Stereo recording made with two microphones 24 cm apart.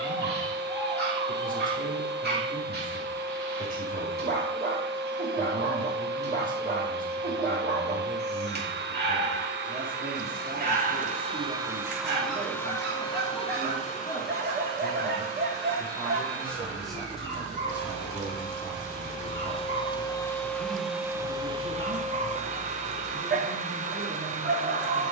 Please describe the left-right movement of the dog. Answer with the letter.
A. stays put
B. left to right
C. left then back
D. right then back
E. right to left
A.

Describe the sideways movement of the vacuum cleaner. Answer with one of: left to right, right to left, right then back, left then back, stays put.
left then back.